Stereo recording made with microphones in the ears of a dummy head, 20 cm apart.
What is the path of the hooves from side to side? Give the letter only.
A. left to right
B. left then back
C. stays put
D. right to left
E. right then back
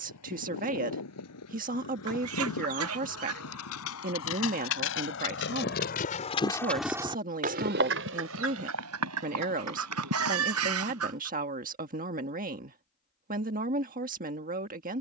A.